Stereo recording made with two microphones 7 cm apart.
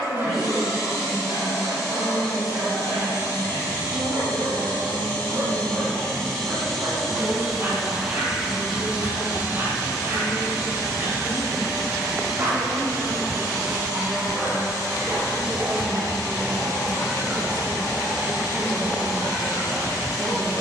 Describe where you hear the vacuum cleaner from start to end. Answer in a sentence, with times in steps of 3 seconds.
You can hear the vacuum cleaner on the left from 0 s, in the centre from 6 s and on the right from 9 s.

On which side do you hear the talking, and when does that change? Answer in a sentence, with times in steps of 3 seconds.
In this clip you hear the talking on the left from 0 s, in the centre from 12 s and on the right from 15 s.